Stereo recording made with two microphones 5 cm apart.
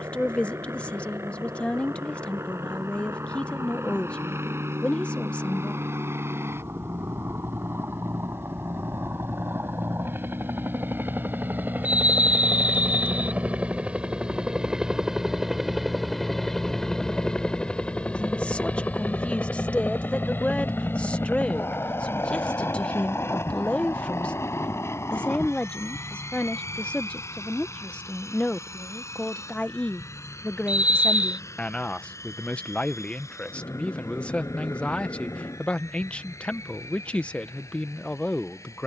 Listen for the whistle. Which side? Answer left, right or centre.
right.